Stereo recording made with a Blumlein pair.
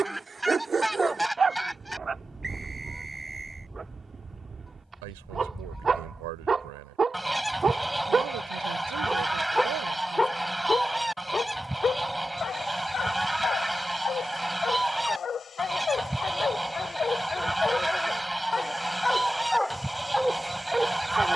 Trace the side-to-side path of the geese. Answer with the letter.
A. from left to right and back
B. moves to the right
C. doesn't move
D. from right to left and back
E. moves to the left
C.